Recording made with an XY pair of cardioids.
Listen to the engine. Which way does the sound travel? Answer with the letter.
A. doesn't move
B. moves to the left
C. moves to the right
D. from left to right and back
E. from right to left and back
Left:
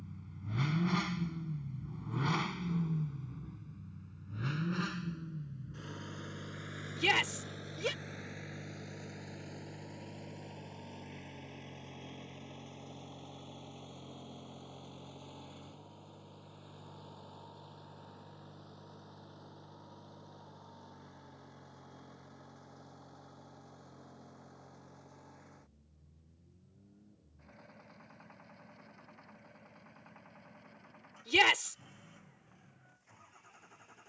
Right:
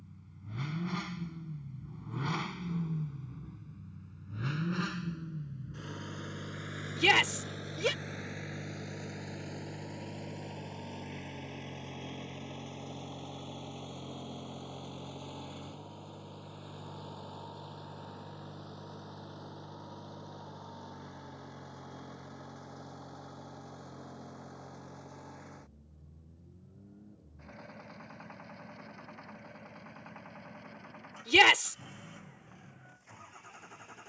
C.